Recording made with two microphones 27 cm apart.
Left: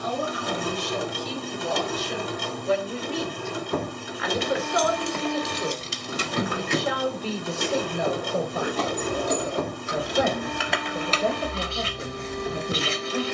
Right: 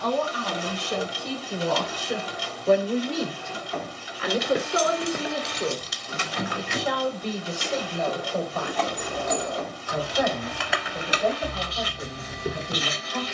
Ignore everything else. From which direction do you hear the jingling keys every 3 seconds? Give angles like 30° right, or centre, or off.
off, 10° right, 50° left, centre, 40° right.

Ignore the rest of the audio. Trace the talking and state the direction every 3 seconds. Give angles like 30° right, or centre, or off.
60° right, 30° right, 10° left, 20° left, 20° left.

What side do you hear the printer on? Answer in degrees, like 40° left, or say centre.
60° left.